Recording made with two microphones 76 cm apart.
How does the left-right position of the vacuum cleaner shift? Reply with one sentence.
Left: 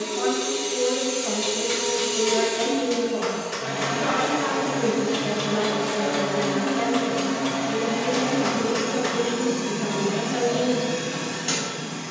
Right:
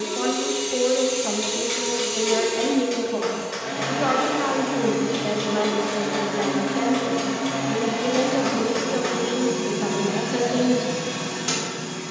In this clip you hear the vacuum cleaner go left and come back.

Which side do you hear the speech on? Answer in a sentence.
You can hear the speech on the right.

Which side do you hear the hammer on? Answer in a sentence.
In this clip you hear the hammer on the left.